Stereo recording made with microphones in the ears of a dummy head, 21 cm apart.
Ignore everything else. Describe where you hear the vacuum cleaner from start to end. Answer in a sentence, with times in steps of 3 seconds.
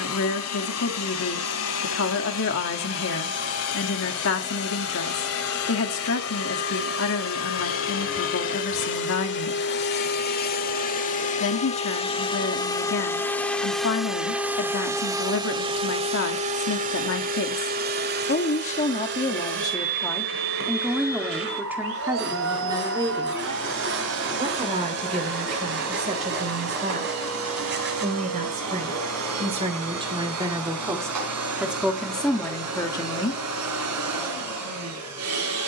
In this clip you hear the vacuum cleaner on the left from 0 s, in the centre from 12 s and on the right from 15 s.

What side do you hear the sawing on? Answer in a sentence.
In this clip you hear the sawing on the right.